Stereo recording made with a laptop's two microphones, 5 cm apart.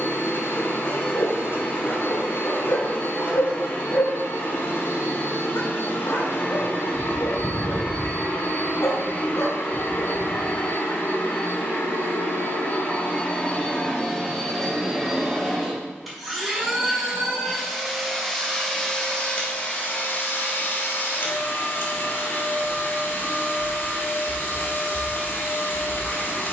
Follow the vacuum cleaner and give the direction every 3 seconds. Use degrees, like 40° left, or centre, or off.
50° left, 50° left, 50° left, 50° left, 30° left, centre, 30° left, 40° left, 40° left.